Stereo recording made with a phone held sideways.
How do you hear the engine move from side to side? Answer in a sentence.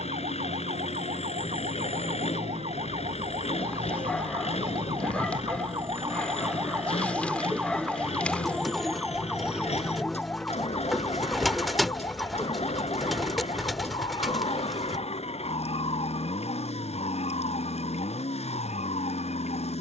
You can hear the engine stay in one place.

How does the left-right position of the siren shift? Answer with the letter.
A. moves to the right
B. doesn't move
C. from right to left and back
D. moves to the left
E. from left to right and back
D.